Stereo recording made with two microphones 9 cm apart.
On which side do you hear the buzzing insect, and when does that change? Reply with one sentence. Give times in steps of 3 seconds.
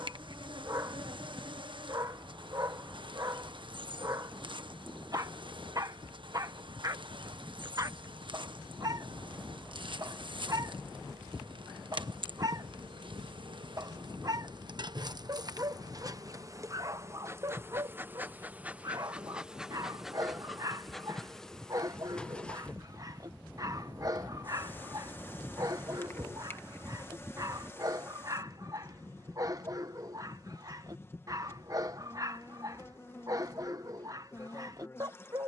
In this clip you hear the buzzing insect on the right from 0 s, in the centre from 18 s and on the left from 24 s.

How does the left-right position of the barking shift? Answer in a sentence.
You can hear the barking stay put.